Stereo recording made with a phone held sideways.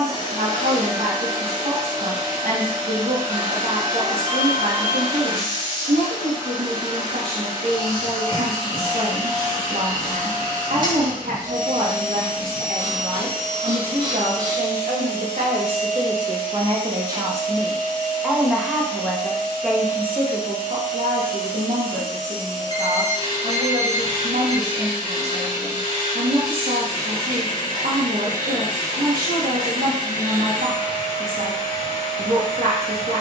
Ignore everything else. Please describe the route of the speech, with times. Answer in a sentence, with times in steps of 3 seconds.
You can hear the speech on the right from 0 s, in the centre from 18 s and on the right from 21 s.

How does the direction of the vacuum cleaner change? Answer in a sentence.
You can hear the vacuum cleaner stay in one place.